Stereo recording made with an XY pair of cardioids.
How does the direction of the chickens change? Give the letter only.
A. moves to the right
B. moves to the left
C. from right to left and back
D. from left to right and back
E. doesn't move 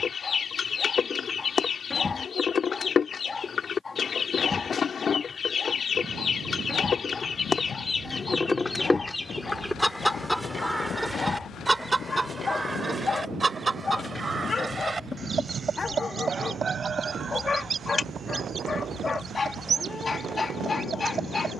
A.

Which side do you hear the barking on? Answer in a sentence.
You can hear the barking on the left.